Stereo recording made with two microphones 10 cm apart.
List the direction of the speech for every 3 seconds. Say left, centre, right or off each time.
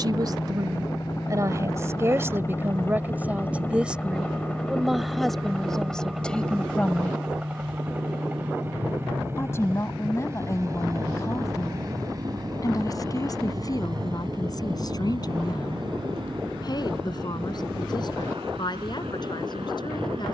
right, centre, centre, left, left, left, left.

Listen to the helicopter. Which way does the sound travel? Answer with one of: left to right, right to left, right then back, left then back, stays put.
left to right.